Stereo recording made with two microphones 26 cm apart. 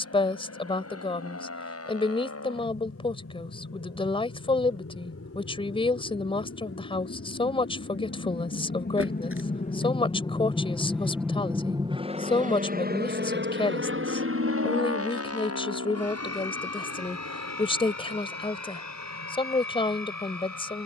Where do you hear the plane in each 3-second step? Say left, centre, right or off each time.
left, left, left, centre, right, right, right.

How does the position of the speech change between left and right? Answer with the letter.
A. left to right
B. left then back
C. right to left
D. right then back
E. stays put
E.